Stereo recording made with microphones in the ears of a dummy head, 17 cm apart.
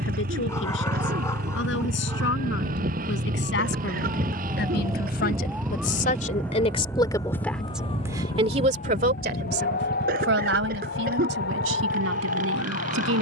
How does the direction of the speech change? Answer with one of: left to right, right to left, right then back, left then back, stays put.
left to right.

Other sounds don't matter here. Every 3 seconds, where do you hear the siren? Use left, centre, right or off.
right, right, left, left, left.